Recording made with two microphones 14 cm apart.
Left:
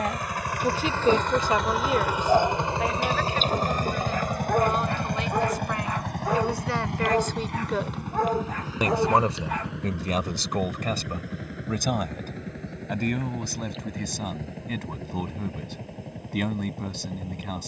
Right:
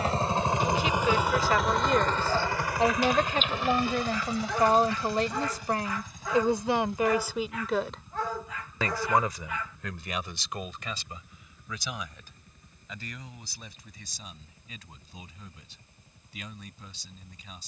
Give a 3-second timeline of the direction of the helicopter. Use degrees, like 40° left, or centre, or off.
centre, 50° left, 70° left, 80° left, 80° left, 80° left.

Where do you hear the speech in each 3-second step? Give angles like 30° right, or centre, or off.
20° left, 40° right, 10° right, 40° left, 60° left, 70° left.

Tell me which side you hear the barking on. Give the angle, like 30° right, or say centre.
50° left.